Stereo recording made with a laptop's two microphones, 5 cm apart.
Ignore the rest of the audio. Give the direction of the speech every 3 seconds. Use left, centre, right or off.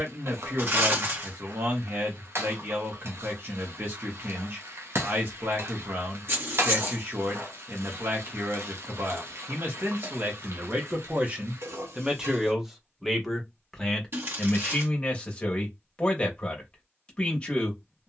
right, right, right, right, centre, left.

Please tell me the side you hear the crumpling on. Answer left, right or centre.
right.